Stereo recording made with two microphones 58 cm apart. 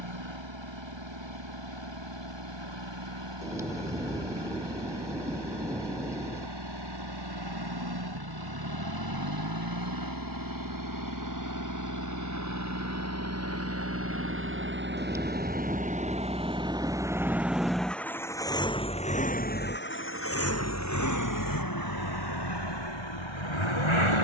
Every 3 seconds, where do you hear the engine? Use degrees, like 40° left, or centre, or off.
50° right, 50° right, 40° right, 30° right, 20° right, 10° right, 20° left, 40° left.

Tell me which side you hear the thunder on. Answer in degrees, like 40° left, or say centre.
centre.